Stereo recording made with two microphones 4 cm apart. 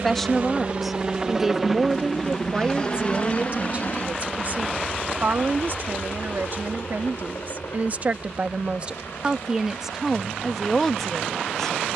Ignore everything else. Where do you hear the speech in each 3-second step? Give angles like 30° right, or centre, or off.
10° right, 40° right, 50° right, centre.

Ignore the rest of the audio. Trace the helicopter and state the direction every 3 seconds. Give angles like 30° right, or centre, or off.
10° right, 40° left, 60° left, 70° left.